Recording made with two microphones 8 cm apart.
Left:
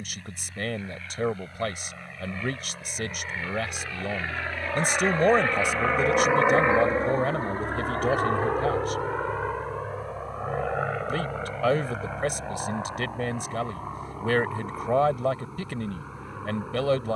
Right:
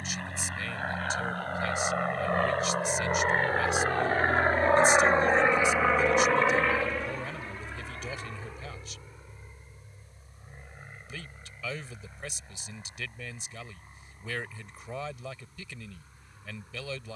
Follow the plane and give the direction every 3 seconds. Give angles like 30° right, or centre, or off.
70° right, 40° right, 40° left, 70° left, 80° left, 80° left.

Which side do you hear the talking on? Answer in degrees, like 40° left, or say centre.
60° left.